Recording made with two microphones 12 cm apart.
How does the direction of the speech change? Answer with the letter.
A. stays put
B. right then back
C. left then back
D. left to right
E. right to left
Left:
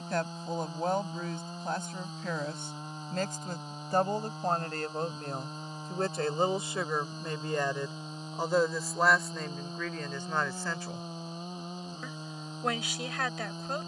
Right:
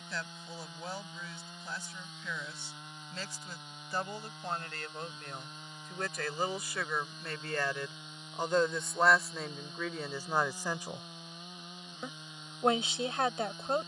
D.